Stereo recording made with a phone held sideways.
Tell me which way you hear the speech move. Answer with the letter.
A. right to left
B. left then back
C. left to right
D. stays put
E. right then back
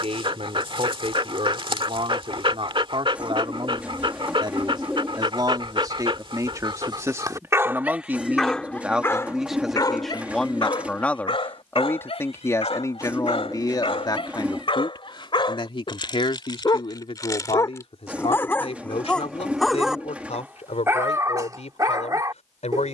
A.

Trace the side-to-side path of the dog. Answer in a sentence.
In this clip you hear the dog go left and come back.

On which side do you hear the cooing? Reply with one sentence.
You can hear the cooing in the centre.